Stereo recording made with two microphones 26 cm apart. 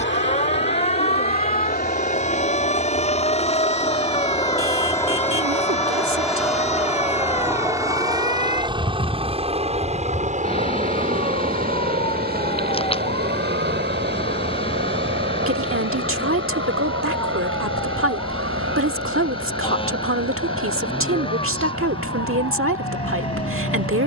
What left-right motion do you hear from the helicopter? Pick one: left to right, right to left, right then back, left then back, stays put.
left to right.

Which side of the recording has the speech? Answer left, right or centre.
right.